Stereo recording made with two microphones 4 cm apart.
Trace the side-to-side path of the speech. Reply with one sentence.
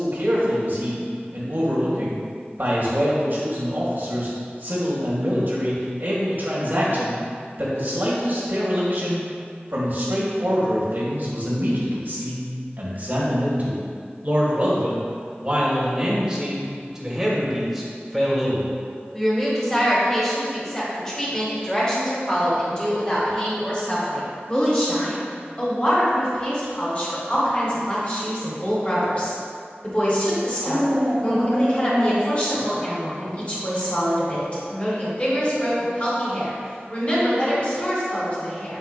In this clip you hear the speech go from the right side to the left.